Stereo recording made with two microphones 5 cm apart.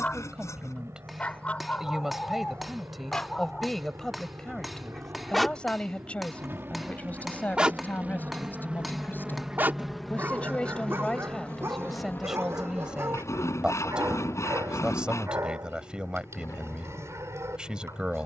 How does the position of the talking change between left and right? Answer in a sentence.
In this clip you hear the talking go left and come back.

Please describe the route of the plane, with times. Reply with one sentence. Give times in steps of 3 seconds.
You can hear the plane on the right from 0 s, in the centre from 9 s and on the left from 12 s.